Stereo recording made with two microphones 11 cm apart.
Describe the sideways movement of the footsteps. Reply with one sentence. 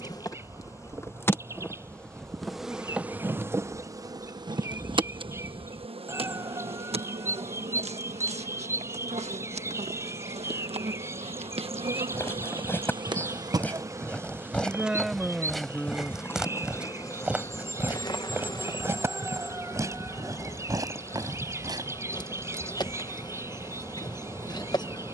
You can hear the footsteps move from left to right.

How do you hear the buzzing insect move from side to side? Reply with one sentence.
In this clip you hear the buzzing insect move from left to right and back again.